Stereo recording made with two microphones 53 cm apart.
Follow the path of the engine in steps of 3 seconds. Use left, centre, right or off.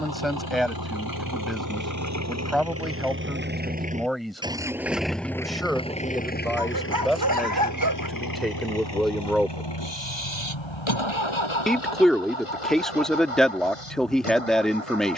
right, centre, left, left, left.